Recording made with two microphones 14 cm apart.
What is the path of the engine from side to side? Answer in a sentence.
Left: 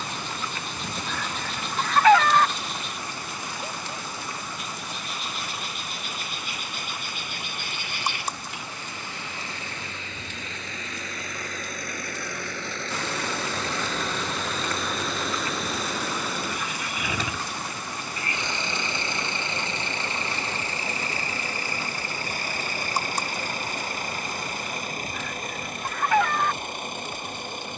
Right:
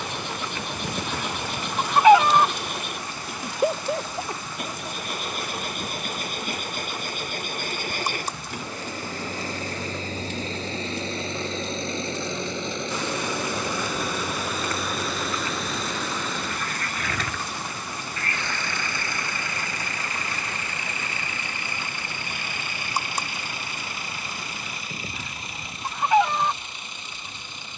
In this clip you hear the engine travel towards the left.